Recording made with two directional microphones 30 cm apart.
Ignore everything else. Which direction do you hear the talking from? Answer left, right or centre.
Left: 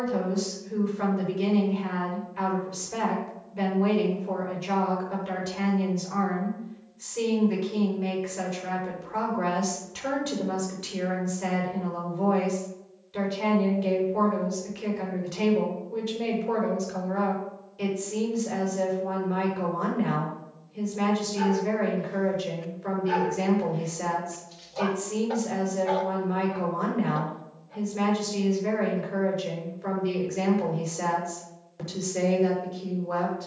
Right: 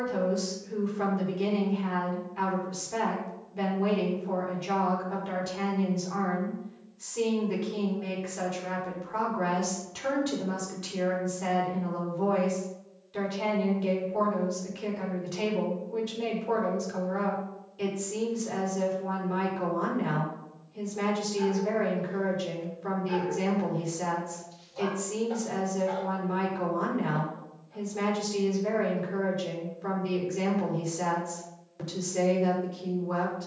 centre.